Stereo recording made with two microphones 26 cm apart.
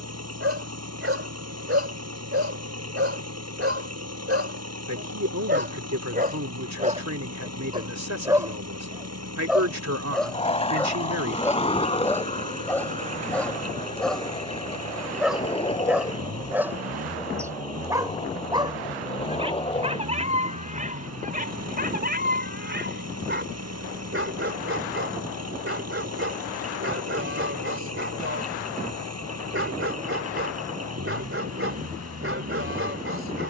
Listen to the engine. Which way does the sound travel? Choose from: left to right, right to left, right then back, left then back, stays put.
stays put.